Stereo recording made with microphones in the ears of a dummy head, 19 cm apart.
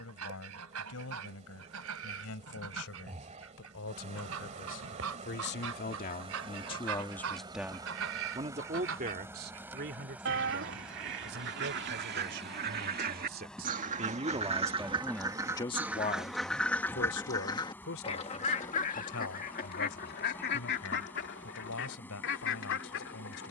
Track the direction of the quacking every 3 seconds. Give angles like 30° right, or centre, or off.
80° right, 70° right, 70° right, 60° right, 40° right, centre, 40° left, 60° left.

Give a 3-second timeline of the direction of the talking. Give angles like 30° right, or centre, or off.
80° left, 60° left, centre, 50° right, 40° right, 40° left, 70° left, 80° left.